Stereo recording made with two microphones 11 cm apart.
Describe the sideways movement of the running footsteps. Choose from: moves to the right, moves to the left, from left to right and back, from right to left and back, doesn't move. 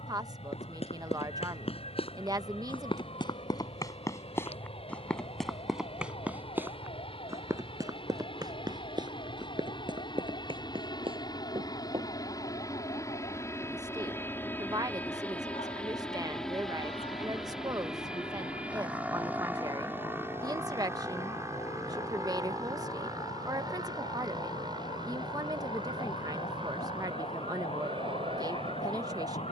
moves to the right.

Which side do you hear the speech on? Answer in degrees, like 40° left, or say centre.
30° right.